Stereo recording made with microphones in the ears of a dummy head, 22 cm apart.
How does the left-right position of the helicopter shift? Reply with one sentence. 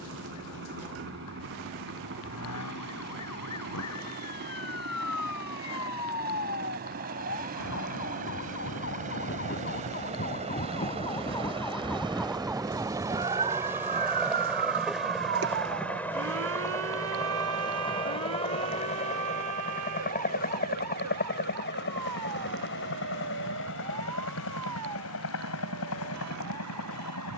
In this clip you hear the helicopter travel towards the left.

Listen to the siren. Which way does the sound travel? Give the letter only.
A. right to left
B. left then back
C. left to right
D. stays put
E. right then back
C.